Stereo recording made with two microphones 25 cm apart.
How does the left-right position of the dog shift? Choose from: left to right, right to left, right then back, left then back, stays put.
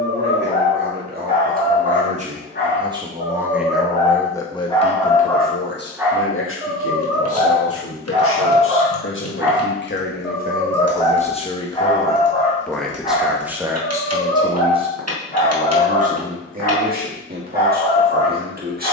right then back.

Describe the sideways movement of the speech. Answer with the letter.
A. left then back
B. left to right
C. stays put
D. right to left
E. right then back
A.